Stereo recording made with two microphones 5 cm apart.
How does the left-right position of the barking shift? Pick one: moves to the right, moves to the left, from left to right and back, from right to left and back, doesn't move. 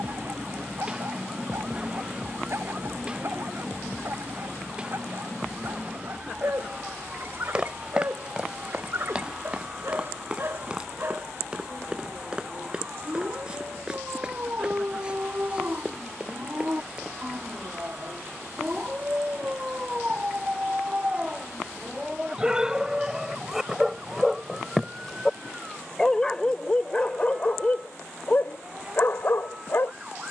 moves to the left.